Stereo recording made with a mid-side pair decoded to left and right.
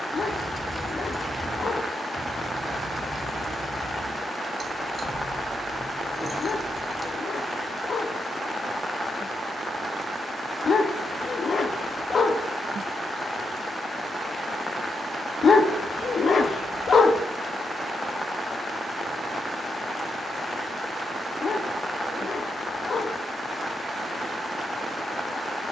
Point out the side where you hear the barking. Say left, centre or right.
left.